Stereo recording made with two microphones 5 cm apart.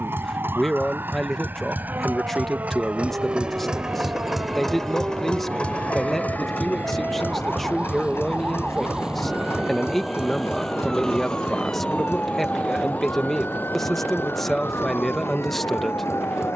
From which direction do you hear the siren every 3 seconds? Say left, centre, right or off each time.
right, right, right, centre, left, left.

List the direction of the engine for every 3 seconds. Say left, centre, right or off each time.
right, centre, left, left, left, left.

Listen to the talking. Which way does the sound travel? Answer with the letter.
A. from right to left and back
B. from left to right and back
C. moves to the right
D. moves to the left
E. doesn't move
E.